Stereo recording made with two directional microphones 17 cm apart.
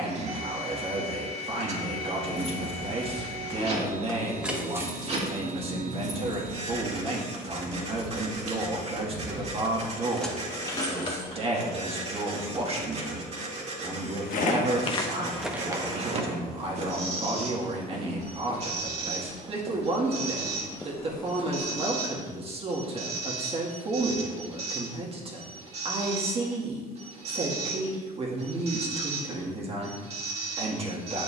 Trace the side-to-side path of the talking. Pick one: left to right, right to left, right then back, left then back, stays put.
stays put.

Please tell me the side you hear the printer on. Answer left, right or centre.
right.